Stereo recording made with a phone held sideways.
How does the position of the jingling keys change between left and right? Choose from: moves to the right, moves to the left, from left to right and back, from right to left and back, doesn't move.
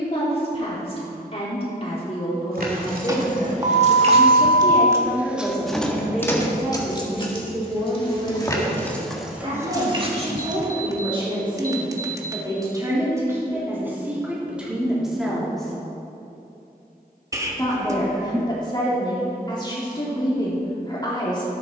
from right to left and back.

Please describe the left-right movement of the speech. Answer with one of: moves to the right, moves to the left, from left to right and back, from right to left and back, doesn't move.
from left to right and back.